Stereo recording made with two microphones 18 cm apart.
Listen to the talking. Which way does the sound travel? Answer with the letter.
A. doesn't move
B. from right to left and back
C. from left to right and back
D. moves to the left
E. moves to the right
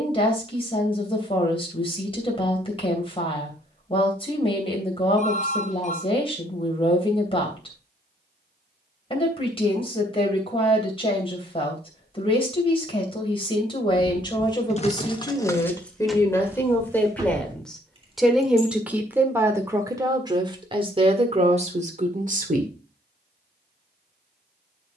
E.